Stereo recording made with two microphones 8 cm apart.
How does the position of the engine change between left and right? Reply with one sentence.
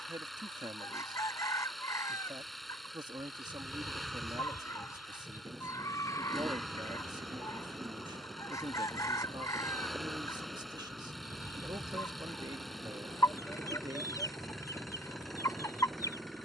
You can hear the engine stay put.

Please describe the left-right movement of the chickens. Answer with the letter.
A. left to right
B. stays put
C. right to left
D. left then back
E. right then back
B.